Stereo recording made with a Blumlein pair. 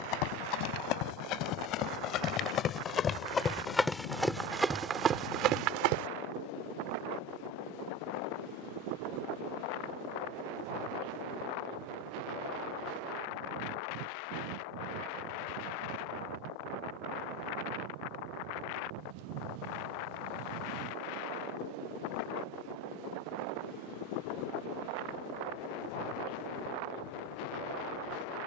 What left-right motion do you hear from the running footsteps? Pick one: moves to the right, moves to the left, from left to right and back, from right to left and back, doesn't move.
moves to the right.